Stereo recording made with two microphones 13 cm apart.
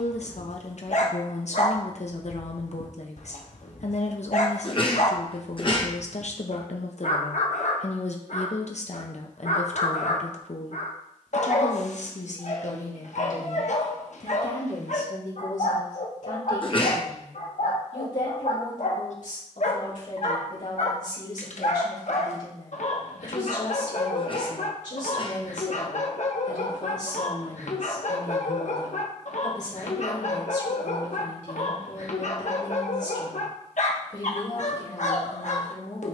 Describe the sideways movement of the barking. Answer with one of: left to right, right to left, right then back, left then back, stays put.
stays put.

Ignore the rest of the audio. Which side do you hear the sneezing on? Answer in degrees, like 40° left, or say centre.
40° left.